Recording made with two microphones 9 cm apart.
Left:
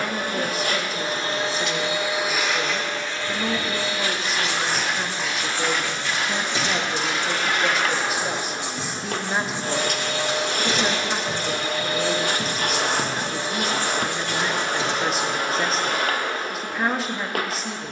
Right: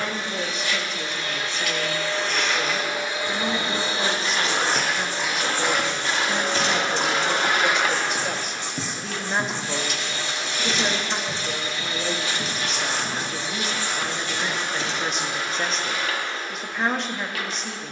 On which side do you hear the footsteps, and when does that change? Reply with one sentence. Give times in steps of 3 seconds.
You can hear the footsteps not at all from 0 s, in the centre from 3 s, on the right from 6 s, in the centre from 9 s and not at all from 15 s.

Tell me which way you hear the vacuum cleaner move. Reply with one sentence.
You can hear the vacuum cleaner move from left to right and back again.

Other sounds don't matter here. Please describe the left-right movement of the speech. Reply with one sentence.
You can hear the speech stay in one place.